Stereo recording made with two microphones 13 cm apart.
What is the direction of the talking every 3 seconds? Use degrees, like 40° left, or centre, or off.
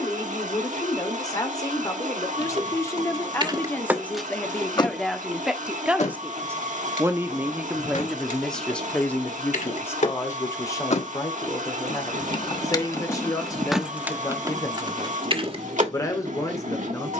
30° left, 10° left, 10° right, 20° left, 30° left, 30° left.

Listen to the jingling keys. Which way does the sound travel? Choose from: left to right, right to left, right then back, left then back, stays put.
left then back.